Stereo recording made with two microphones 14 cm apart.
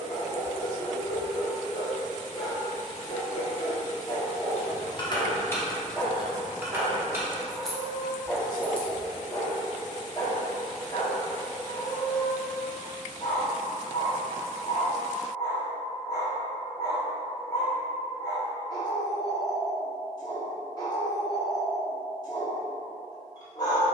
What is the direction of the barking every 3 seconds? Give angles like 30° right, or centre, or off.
30° left, 20° left, centre, 30° left, 30° left, 30° left, 30° left, 30° left.